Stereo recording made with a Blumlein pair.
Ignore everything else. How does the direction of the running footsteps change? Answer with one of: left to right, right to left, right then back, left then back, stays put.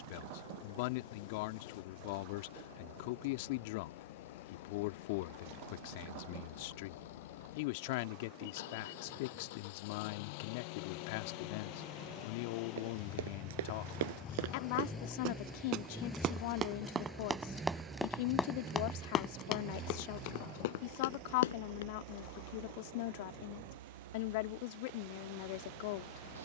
right to left.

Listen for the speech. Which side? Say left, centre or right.
left.